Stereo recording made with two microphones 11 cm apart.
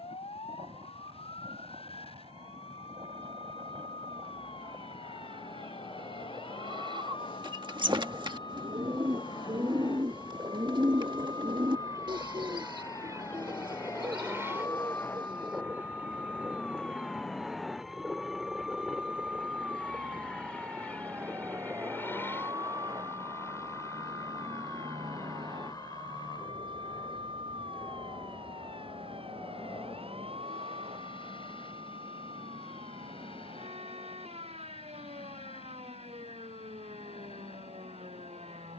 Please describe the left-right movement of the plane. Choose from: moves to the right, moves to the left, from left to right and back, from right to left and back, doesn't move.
moves to the left.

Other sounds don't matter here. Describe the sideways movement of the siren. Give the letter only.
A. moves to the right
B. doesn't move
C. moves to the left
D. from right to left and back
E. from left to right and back
A.